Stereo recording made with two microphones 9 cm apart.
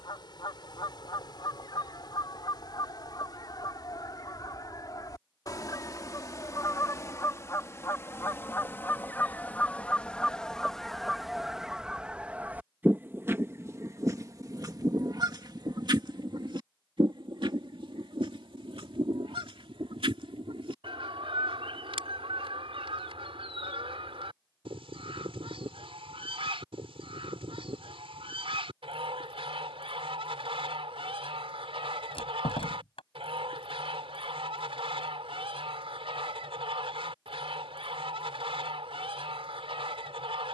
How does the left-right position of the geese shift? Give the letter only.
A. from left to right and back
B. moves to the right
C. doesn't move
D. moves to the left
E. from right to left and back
B.